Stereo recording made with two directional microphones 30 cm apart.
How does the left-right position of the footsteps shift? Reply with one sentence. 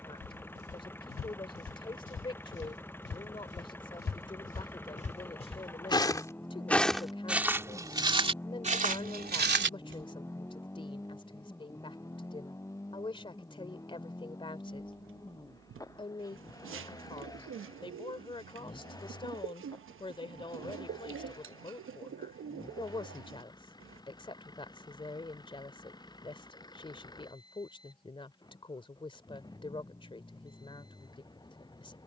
In this clip you hear the footsteps move to the right.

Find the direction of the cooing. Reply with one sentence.
You can hear the cooing on the right.